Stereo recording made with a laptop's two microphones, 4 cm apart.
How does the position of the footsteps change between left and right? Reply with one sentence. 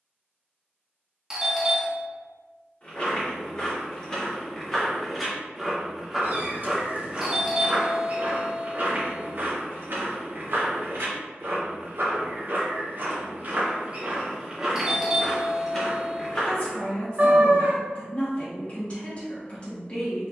In this clip you hear the footsteps move from left to right and back again.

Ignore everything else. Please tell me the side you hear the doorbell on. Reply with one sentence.
You can hear the doorbell in the centre.